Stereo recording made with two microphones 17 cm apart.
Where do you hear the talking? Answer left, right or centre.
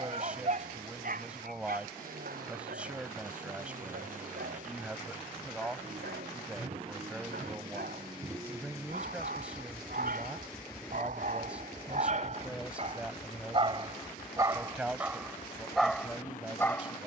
centre.